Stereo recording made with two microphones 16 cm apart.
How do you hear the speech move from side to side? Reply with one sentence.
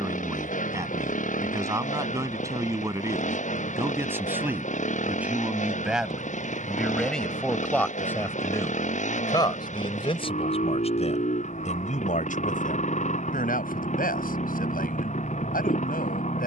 You can hear the speech move from right to left.